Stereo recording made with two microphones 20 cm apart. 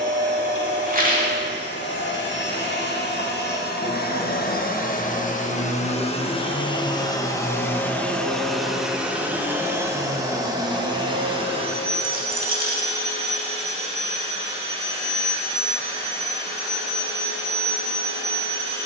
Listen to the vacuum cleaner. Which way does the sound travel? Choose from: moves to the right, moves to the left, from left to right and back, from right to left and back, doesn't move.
moves to the right.